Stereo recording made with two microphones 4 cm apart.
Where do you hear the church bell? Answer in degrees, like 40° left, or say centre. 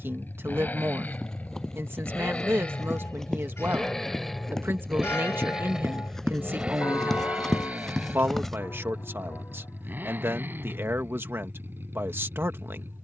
90° left.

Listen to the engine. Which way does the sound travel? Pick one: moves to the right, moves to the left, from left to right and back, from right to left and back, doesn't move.
moves to the right.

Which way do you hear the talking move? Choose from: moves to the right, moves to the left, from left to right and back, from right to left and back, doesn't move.
doesn't move.